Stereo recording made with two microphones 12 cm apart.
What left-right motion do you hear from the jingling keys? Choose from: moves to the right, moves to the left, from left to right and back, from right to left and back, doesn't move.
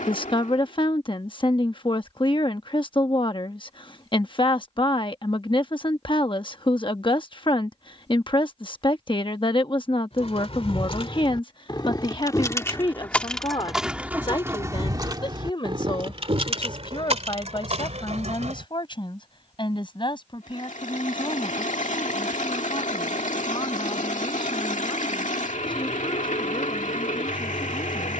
moves to the right.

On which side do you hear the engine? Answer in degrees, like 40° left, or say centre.
80° left.